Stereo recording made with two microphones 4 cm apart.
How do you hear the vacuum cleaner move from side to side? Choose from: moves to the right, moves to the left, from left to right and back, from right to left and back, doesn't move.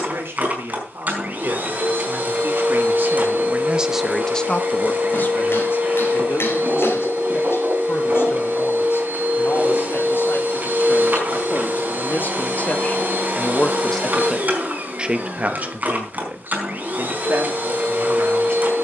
doesn't move.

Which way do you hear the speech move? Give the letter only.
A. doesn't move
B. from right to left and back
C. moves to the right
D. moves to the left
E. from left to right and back
B.